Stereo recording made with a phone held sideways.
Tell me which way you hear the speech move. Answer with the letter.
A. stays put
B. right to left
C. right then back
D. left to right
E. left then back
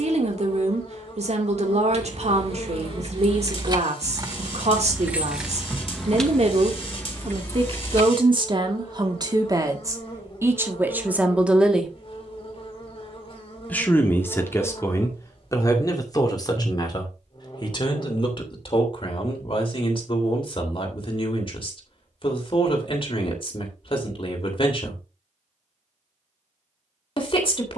B.